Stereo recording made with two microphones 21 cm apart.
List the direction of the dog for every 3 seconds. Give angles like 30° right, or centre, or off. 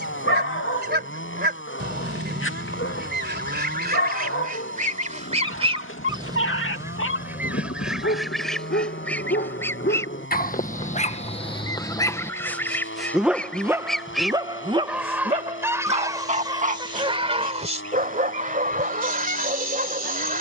70° left, 70° left, 70° left, 40° left, 10° right, 40° right, 50° right.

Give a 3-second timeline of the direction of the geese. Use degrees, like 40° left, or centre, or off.
50° right, 40° right, 10° right, 10° left, 10° left, 20° right, 40° right.